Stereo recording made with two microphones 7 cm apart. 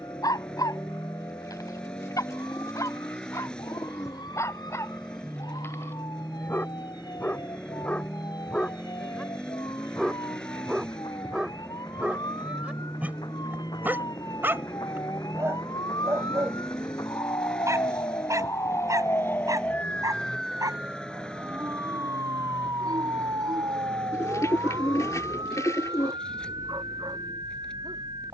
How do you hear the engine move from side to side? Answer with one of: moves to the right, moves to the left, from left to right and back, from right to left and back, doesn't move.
doesn't move.